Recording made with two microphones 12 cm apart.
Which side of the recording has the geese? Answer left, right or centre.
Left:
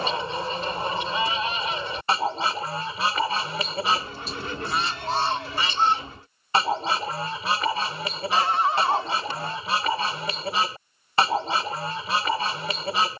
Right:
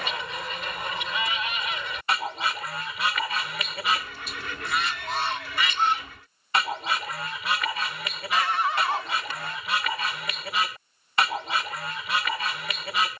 left.